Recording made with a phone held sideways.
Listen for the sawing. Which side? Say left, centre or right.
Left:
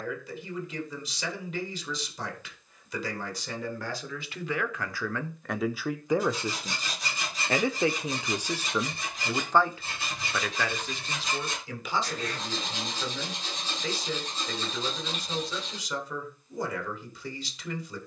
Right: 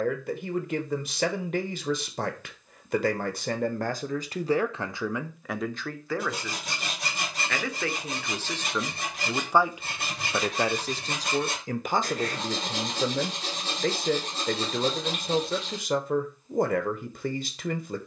right.